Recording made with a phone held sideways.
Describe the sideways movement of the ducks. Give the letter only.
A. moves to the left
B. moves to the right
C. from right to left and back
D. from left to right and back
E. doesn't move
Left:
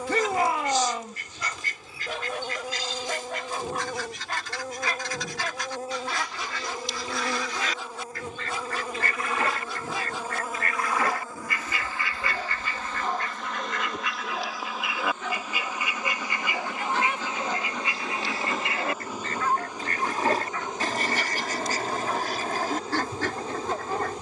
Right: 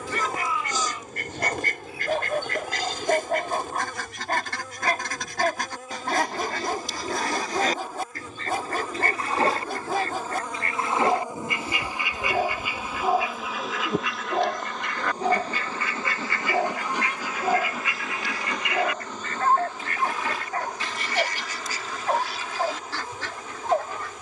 A.